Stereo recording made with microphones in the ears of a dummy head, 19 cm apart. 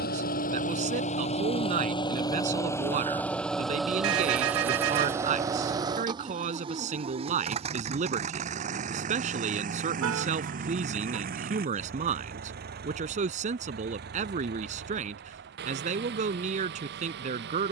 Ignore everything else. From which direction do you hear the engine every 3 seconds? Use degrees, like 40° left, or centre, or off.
30° left, 10° right, 30° right, 40° right, 50° right, 50° right.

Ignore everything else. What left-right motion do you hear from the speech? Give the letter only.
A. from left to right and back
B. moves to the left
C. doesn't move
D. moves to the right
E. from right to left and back
C.